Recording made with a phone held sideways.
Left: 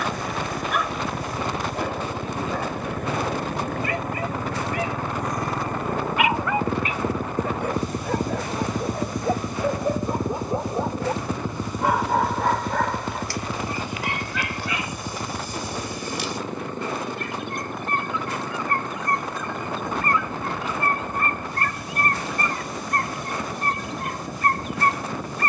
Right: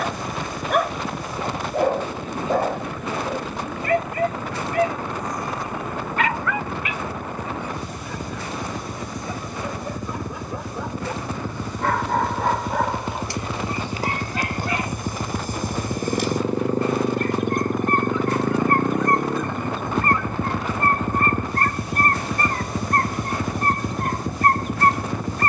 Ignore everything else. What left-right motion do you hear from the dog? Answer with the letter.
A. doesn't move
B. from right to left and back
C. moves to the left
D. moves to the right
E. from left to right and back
B.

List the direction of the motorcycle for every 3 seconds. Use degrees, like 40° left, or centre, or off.
50° left, 50° left, 40° left, 20° left, centre, 30° right, 50° right, 60° right, 70° right.